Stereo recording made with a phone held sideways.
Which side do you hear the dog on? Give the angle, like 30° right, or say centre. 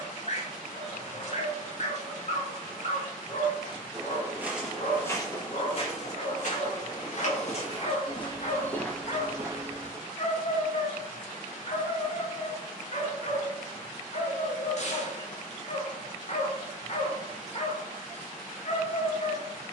50° left.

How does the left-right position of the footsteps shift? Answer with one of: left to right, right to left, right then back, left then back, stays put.
left then back.